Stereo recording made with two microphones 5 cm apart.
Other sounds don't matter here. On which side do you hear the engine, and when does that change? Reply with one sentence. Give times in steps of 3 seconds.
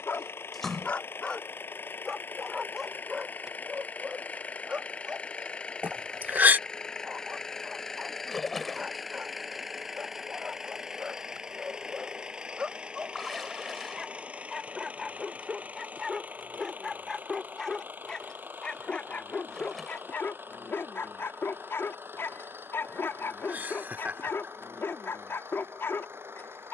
In this clip you hear the engine on the left from 0 s, in the centre from 6 s and on the right from 12 s.